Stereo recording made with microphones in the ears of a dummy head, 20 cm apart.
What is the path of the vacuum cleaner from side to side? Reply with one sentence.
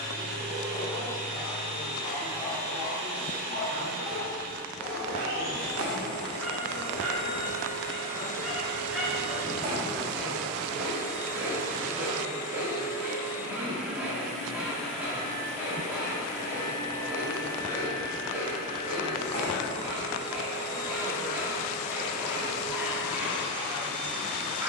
In this clip you hear the vacuum cleaner move from right to left.